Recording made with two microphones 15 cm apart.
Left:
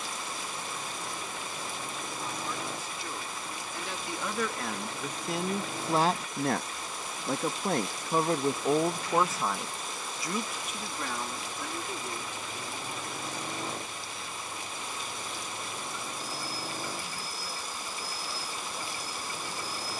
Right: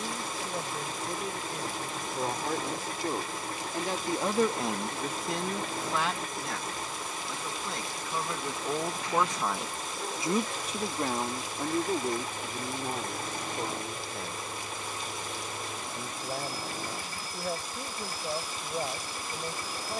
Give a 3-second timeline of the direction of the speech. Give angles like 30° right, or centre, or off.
60° right, 20° right, 50° left, 30° right, 50° right, 60° right, 60° right.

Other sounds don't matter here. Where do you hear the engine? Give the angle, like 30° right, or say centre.
50° right.